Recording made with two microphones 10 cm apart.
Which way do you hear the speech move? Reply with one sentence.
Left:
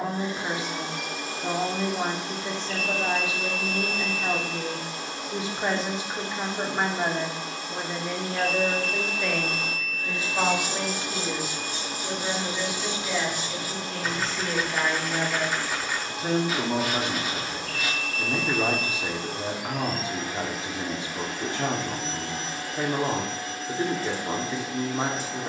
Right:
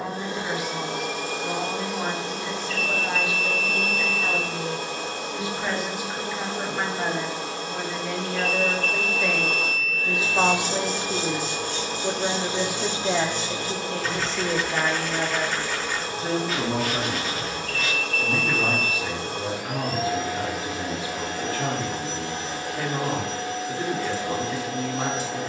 In this clip you hear the speech go right and come back.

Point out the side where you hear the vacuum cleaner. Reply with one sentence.
In this clip you hear the vacuum cleaner on the right.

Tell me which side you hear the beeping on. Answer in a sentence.
You can hear the beeping on the left.